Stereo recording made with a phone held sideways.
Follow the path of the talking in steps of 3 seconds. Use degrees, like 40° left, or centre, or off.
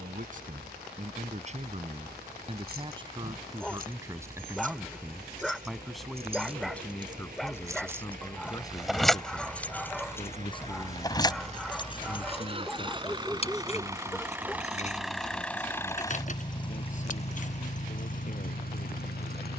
40° right, 10° right, 10° left, 30° left, 40° left, 50° left, 50° left.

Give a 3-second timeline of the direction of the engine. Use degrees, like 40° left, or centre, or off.
60° right, 60° right, 50° right, 40° right, 20° right, 30° left, 60° left.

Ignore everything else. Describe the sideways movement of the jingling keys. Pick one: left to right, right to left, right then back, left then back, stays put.
right to left.